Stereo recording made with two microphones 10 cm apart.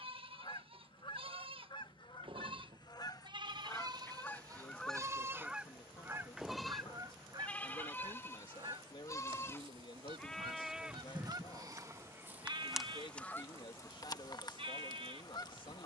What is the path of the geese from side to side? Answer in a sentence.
In this clip you hear the geese move from left to right and back again.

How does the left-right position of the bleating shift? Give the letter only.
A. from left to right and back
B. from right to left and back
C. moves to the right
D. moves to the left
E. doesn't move
B.